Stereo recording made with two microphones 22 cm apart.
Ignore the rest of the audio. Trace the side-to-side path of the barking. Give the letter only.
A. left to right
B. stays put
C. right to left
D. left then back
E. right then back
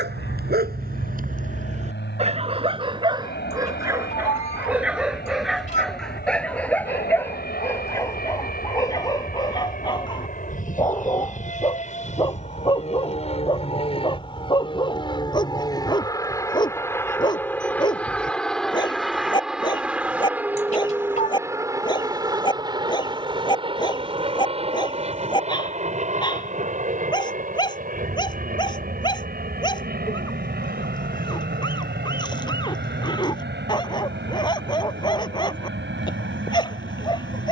C.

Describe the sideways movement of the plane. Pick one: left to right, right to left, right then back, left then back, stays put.
left to right.